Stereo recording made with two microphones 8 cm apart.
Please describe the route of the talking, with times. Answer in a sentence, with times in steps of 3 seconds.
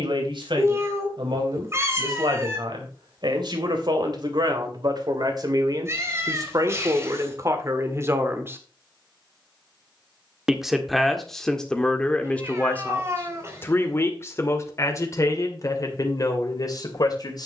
You can hear the talking on the right from 0 s, in the centre from 9 s and on the left from 12 s.